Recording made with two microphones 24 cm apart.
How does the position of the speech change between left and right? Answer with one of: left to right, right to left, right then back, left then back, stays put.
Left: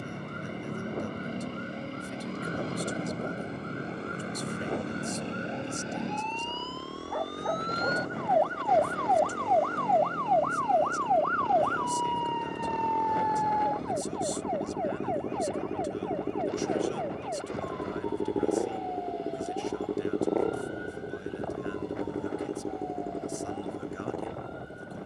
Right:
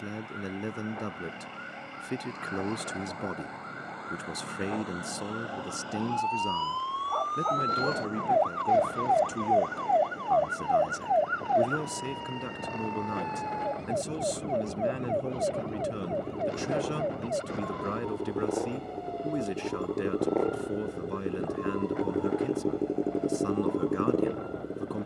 stays put.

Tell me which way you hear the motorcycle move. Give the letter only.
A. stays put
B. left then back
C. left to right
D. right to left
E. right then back
C.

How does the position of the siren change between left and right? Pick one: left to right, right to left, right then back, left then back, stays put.
left to right.